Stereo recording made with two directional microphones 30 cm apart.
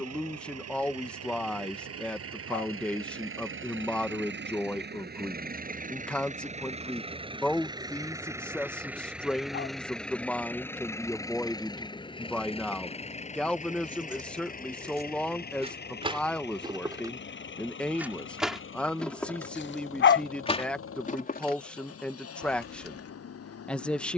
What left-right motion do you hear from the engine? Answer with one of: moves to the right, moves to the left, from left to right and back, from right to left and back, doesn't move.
moves to the left.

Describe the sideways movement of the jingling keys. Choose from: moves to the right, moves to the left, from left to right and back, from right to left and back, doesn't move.
moves to the left.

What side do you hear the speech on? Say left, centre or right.
centre.